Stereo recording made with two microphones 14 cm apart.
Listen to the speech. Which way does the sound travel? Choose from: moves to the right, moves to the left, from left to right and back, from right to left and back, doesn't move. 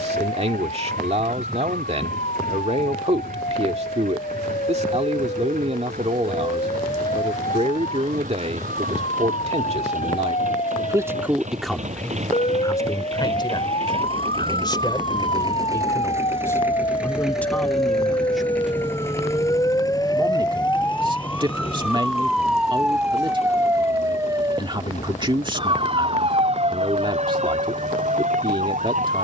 from right to left and back.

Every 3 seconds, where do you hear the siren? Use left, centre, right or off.
left, left, left, left, left, left, left, centre, right, right.